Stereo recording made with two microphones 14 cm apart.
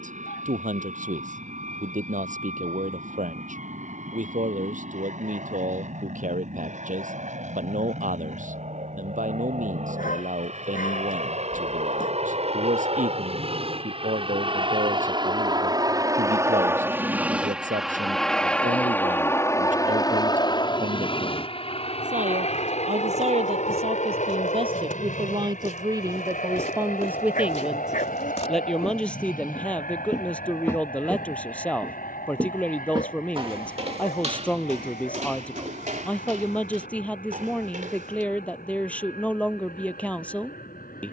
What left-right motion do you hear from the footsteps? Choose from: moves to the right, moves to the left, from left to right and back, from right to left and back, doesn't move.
moves to the right.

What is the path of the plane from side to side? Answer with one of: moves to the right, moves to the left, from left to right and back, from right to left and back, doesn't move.
moves to the left.